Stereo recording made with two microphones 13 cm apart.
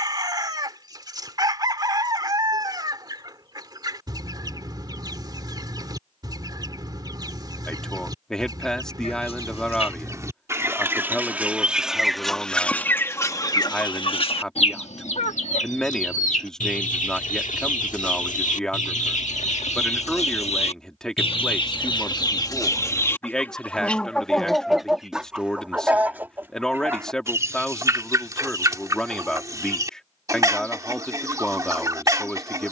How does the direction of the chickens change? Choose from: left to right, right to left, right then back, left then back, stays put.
left then back.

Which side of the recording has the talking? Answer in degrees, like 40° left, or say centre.
centre.